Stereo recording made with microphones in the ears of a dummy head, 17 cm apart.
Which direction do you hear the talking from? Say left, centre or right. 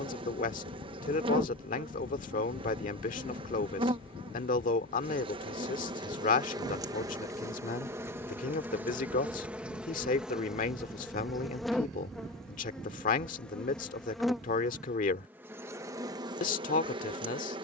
left.